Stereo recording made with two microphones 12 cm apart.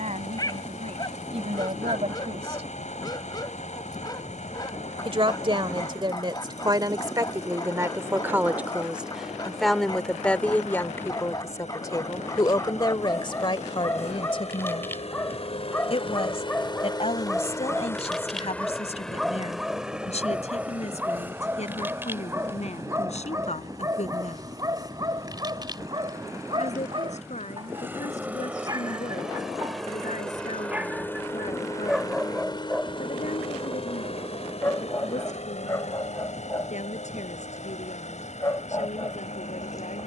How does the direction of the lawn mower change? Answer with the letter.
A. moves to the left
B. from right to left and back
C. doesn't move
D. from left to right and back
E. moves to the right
D.